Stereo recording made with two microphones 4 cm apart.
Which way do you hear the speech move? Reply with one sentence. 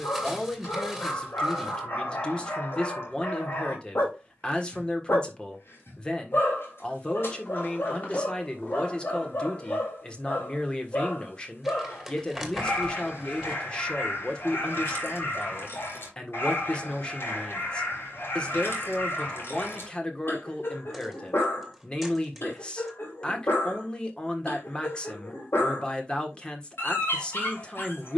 You can hear the speech stay in one place.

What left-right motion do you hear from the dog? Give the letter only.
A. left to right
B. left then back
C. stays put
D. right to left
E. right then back
C.